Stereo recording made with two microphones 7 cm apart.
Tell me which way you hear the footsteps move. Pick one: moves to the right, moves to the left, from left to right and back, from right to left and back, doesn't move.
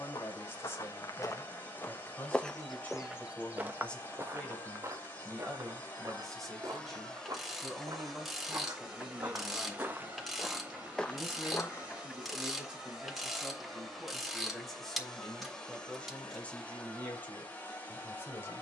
from left to right and back.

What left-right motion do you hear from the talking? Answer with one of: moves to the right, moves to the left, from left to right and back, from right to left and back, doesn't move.
from left to right and back.